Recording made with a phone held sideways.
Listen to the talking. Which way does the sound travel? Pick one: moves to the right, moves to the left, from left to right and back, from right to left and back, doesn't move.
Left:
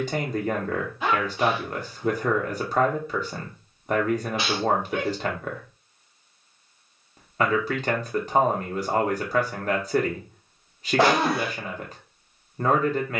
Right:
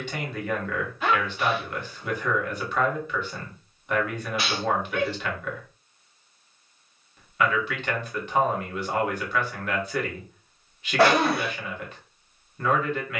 doesn't move.